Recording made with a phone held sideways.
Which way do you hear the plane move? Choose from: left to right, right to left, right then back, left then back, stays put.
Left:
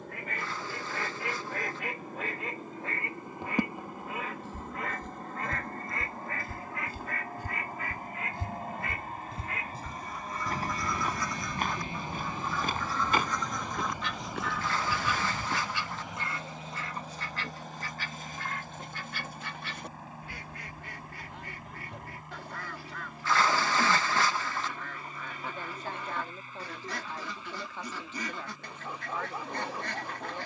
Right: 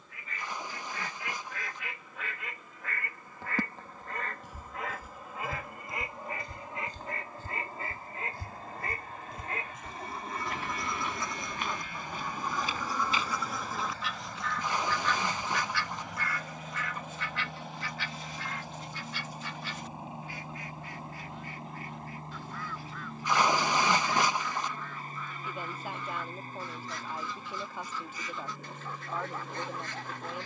left to right.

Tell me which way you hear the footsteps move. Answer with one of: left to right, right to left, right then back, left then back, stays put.
right to left.